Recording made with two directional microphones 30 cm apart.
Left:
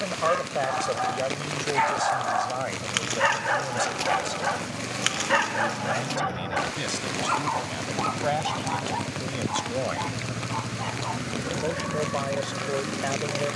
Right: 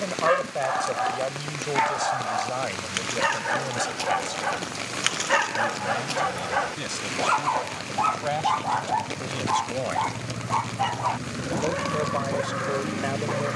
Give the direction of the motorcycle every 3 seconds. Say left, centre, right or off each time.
left, left, left, centre, right.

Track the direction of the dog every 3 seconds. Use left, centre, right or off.
centre, centre, right, right, right.